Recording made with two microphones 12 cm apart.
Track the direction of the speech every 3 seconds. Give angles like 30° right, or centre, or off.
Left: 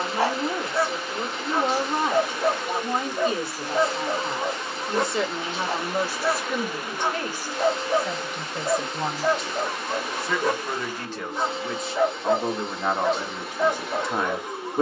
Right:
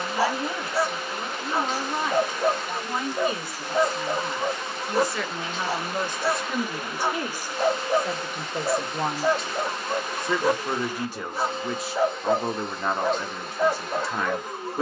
30° left, 30° left, 10° right, 20° right, 10° left.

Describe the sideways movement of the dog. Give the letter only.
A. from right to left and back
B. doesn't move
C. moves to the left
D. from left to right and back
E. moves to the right
B.